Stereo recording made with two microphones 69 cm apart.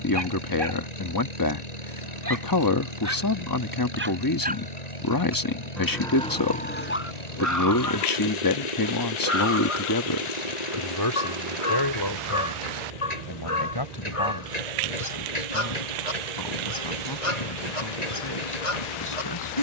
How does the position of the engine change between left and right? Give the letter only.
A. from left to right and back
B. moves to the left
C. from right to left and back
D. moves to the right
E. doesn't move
E.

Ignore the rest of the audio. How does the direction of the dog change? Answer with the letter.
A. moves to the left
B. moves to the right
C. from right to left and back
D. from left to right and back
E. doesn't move
A.